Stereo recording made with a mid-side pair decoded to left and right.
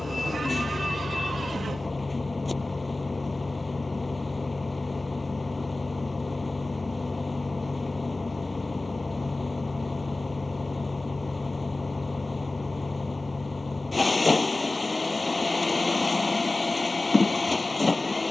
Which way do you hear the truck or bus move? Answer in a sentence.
You can hear the truck or bus stay in one place.